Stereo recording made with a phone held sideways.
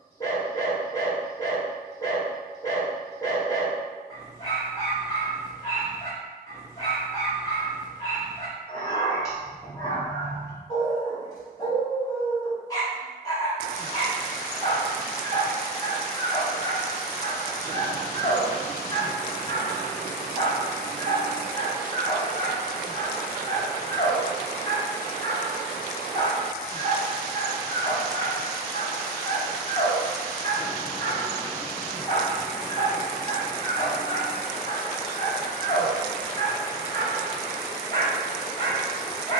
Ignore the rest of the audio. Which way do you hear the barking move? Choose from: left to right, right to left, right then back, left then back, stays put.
stays put.